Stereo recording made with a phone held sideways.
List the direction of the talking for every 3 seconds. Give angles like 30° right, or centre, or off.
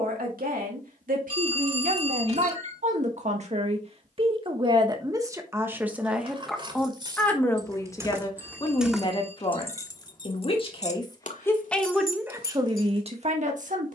70° right, 30° right, 10° left, 30° left, 40° right.